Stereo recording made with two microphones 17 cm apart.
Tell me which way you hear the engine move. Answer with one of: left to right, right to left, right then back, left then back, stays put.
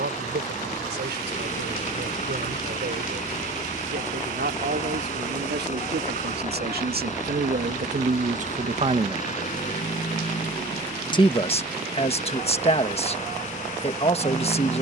stays put.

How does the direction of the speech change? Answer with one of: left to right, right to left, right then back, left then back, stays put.
right to left.